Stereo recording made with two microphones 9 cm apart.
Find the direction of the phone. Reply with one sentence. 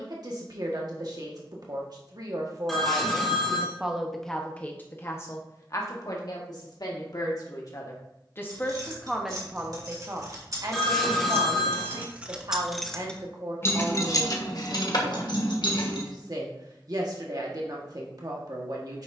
In this clip you hear the phone in the centre.